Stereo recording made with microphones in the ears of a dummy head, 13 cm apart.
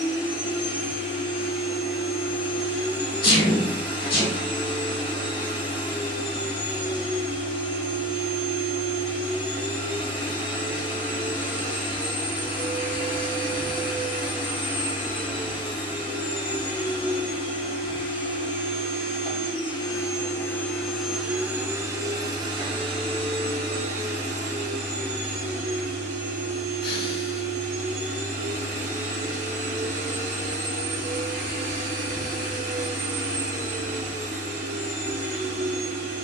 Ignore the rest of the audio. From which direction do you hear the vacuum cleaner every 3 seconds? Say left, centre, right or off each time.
left, left, left, left, left, left, left, right, right, right, right, right.